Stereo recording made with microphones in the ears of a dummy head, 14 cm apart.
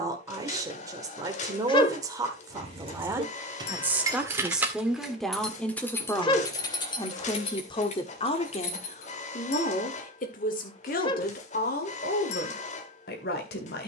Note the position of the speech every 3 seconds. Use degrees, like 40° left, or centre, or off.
20° right, centre, 30° left, 60° left, 70° left.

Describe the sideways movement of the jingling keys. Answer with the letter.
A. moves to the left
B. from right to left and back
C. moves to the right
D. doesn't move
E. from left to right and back
A.